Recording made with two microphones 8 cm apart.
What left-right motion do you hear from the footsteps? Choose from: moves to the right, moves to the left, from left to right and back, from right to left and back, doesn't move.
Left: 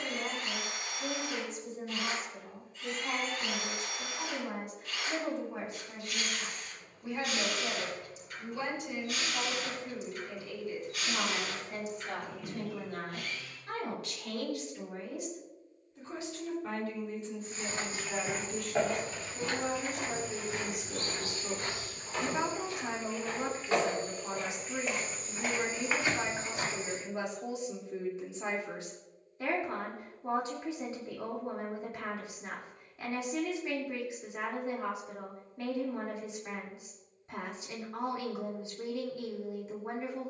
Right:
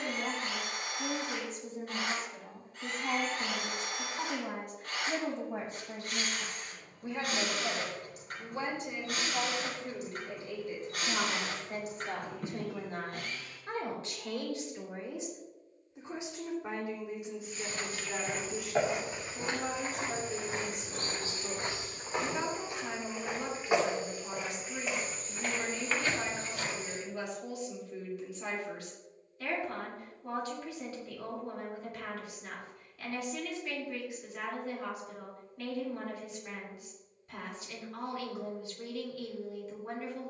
from left to right and back.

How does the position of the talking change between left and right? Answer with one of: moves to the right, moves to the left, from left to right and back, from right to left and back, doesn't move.
moves to the left.